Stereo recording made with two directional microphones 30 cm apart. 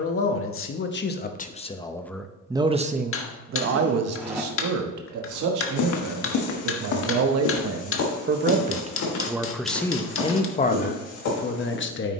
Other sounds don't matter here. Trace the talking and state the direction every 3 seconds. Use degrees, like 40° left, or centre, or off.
20° left, 60° right, 50° right, 20° left.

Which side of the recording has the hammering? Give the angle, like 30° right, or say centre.
40° left.